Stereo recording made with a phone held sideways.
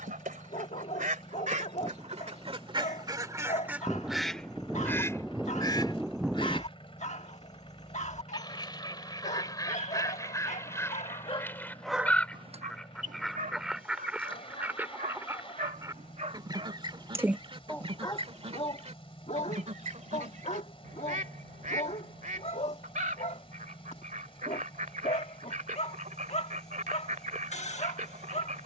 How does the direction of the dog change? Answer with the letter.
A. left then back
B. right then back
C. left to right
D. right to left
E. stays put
B.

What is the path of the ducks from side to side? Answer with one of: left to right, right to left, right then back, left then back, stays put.
left then back.